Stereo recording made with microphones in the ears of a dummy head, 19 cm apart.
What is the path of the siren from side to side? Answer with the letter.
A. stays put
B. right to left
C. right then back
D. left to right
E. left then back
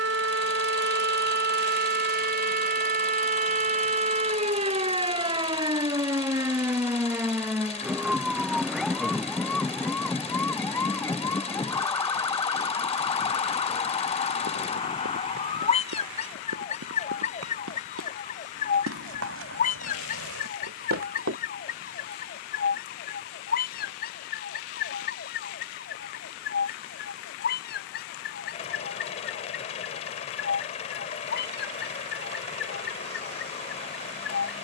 B.